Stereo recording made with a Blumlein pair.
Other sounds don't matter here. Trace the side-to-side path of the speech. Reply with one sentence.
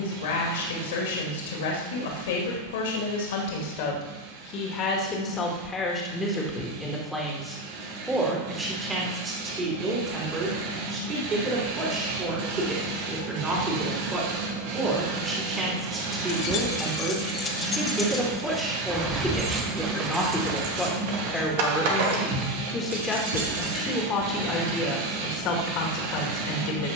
You can hear the speech go right and come back.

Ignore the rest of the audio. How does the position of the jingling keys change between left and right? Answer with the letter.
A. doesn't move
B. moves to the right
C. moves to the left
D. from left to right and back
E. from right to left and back
B.